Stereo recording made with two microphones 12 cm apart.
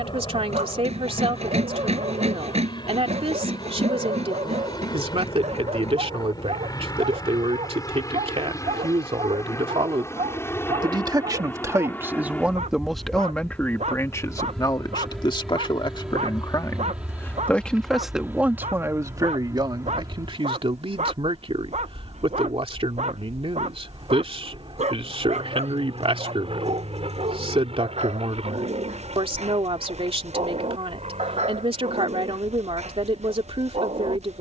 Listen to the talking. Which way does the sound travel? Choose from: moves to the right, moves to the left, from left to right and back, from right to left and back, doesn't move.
from right to left and back.